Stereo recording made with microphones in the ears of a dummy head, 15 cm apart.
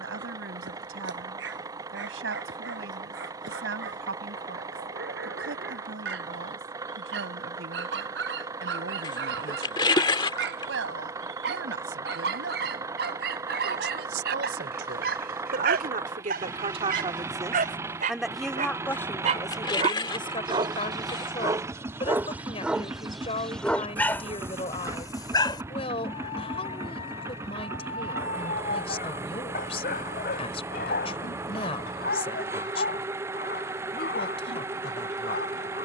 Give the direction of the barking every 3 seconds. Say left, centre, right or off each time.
right, right, right, right, right, right, right, centre, left, left, left, left.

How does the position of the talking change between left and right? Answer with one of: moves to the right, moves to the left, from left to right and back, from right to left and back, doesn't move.
moves to the left.